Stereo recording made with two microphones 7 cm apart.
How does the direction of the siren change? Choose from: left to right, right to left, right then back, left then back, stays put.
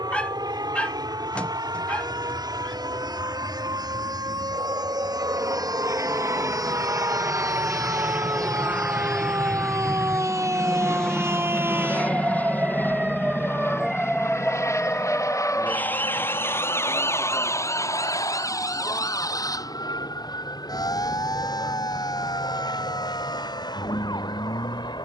right to left.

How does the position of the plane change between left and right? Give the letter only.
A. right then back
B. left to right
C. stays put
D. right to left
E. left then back
D.